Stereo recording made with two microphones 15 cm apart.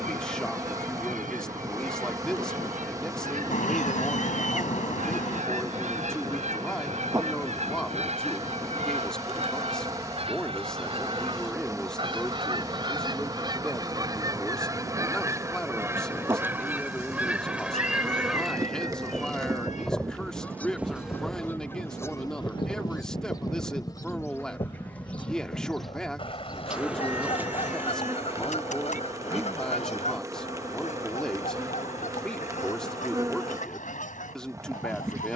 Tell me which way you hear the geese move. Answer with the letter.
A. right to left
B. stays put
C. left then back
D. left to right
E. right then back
A.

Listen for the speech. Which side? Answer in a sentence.
In this clip you hear the speech in the centre.